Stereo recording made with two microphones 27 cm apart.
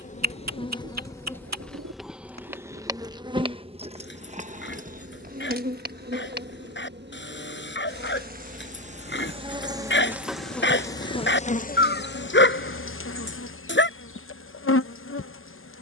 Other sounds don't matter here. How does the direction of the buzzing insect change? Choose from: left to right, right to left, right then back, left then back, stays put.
right then back.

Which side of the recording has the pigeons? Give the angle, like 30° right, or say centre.
80° right.